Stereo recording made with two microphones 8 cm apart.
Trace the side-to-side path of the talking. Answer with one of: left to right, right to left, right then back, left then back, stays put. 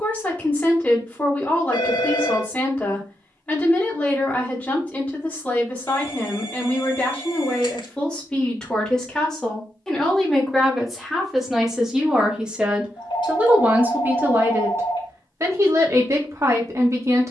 left to right.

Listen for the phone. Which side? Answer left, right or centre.
left.